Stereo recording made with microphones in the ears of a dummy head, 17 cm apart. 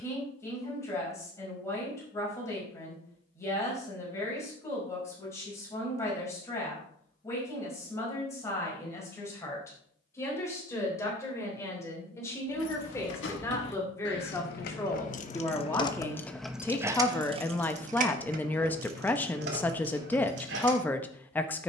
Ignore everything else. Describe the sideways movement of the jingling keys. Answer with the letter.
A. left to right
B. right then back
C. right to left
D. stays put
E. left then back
A.